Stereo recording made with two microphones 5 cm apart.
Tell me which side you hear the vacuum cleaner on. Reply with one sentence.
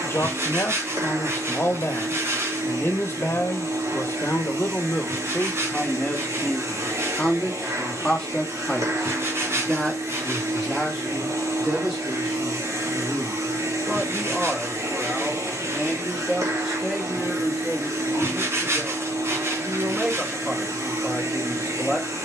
You can hear the vacuum cleaner on the right.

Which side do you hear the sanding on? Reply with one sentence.
In this clip you hear the sanding on the right.